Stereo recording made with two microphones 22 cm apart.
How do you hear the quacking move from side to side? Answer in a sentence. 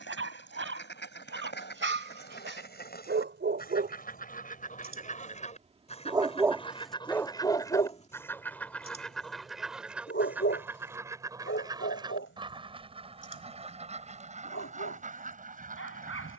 You can hear the quacking move to the right.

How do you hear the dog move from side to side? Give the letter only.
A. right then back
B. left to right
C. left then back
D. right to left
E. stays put
D.